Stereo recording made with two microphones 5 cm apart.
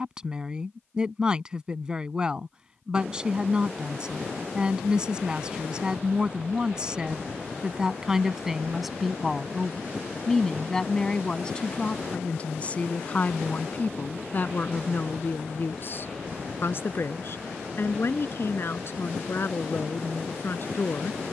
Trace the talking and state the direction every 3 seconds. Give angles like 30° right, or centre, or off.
20° right, 20° right, 10° right, 10° left, 30° left, 50° left, 50° left.